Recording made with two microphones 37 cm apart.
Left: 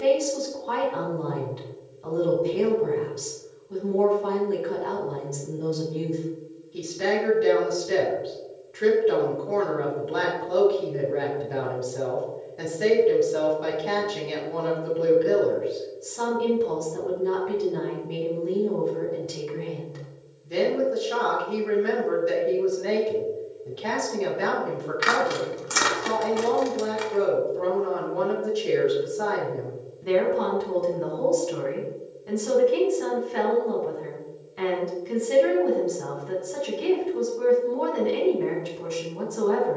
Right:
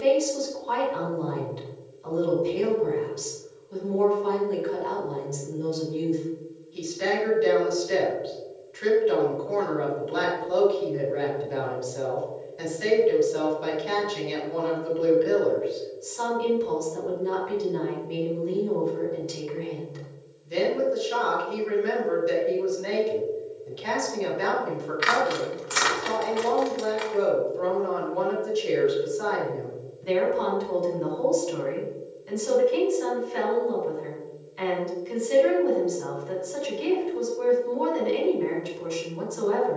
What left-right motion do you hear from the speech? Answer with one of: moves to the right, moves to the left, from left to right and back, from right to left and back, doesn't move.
doesn't move.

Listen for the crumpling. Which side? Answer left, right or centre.
left.